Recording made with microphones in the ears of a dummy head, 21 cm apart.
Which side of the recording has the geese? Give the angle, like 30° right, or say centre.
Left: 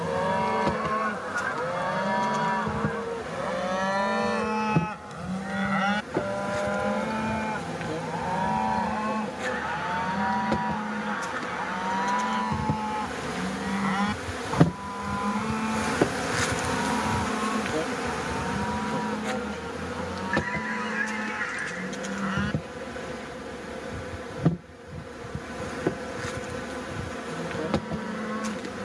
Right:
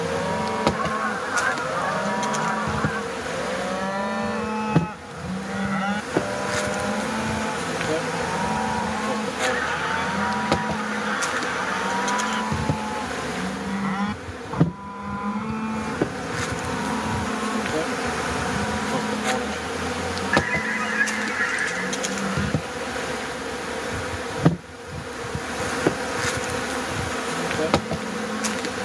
20° right.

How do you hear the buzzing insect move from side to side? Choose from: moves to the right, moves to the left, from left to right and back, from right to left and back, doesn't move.
from right to left and back.